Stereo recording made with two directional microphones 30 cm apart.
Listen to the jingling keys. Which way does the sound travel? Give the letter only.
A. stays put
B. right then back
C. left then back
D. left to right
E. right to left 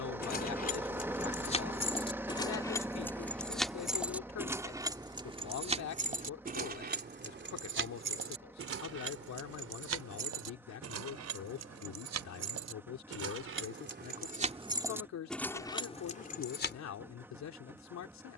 B.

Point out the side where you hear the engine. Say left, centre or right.
centre.